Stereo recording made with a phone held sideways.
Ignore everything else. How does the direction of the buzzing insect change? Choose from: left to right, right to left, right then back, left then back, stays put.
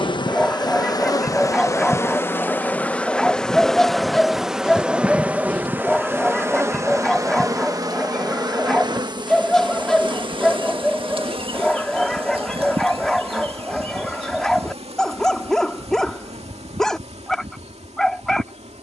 left to right.